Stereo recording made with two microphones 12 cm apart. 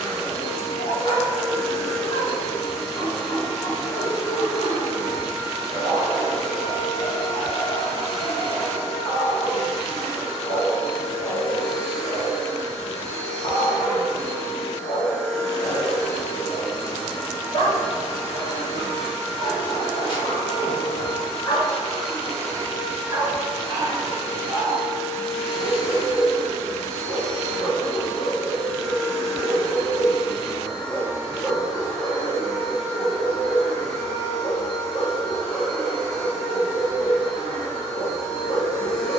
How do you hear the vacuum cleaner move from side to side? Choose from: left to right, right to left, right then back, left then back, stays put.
stays put.